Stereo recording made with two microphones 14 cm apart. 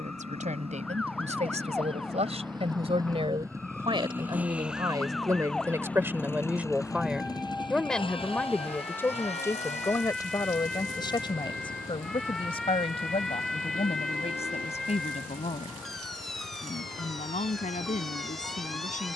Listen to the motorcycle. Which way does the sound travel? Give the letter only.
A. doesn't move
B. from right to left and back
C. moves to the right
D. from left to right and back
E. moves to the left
E.